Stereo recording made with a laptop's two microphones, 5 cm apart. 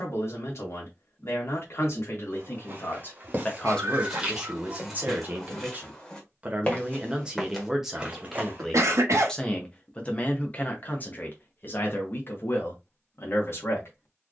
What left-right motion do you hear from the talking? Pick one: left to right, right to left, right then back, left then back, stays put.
right then back.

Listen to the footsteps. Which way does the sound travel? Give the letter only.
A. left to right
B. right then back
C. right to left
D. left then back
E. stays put
D.